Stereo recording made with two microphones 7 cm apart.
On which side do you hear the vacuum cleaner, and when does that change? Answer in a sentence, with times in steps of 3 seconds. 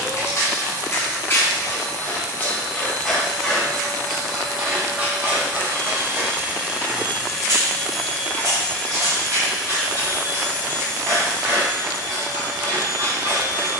You can hear the vacuum cleaner on the right from 0 s, in the centre from 6 s and on the right from 9 s.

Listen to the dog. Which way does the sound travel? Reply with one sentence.
In this clip you hear the dog move from left to right.